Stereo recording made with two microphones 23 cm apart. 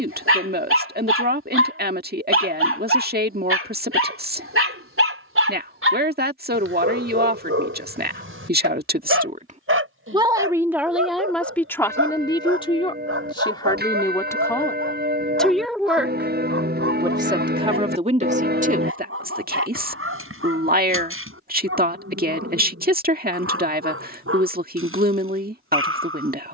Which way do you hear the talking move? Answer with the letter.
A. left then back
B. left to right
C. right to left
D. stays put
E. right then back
A.